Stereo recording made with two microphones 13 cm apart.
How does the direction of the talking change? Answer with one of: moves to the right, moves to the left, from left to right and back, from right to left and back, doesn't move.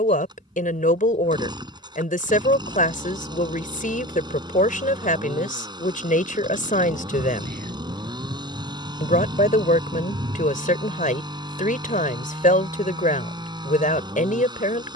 doesn't move.